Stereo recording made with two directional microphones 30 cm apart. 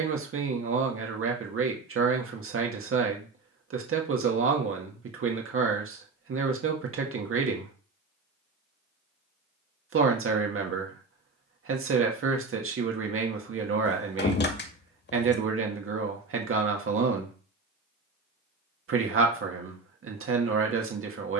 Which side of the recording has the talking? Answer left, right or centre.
right.